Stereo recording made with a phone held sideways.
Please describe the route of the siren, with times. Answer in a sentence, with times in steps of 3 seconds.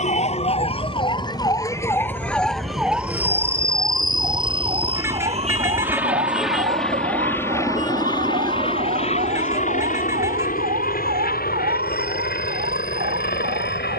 You can hear the siren on the left from 0 s and on the right from 3 s.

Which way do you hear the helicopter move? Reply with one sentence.
You can hear the helicopter go from the right side to the left.